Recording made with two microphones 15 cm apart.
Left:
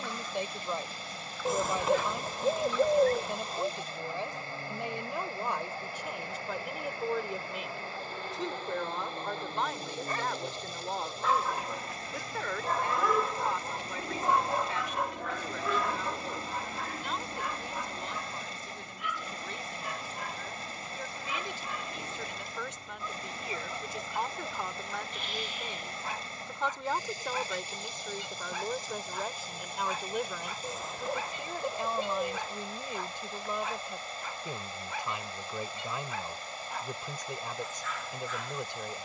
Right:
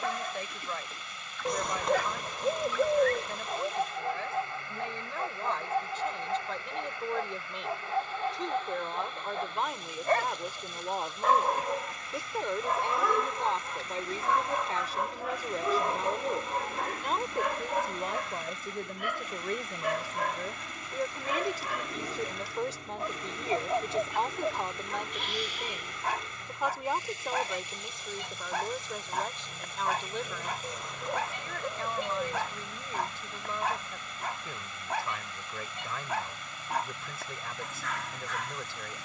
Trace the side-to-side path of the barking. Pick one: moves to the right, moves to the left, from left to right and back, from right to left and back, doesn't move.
from right to left and back.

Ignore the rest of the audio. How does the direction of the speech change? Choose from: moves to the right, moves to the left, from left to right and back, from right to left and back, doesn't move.
from left to right and back.